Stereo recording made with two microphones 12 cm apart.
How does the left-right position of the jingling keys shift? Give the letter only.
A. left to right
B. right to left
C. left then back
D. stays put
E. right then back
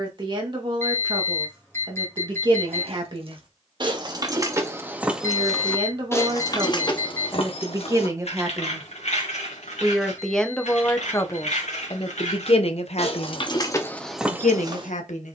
C.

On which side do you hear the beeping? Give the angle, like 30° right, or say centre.
20° left.